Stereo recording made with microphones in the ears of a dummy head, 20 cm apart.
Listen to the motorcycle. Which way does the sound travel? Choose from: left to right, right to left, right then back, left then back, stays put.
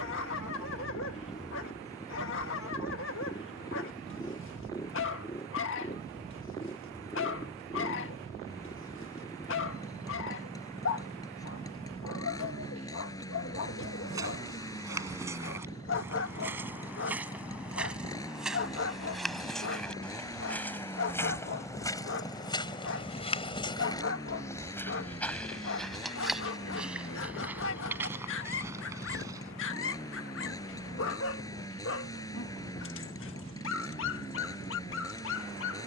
stays put.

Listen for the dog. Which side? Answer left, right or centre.
left.